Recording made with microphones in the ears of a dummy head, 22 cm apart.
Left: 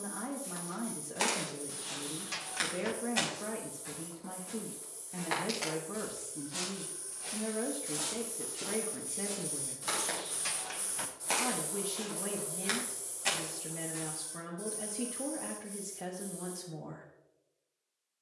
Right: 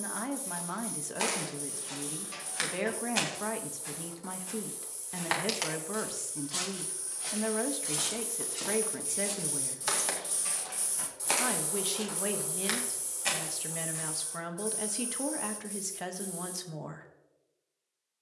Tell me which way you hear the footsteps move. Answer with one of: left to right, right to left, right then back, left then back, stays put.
right then back.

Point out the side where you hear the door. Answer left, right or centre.
left.